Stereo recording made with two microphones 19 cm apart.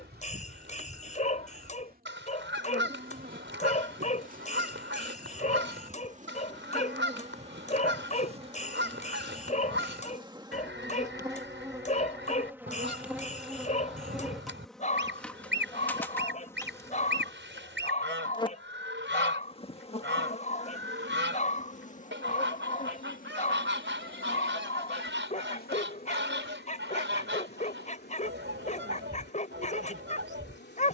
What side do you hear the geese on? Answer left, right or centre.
right.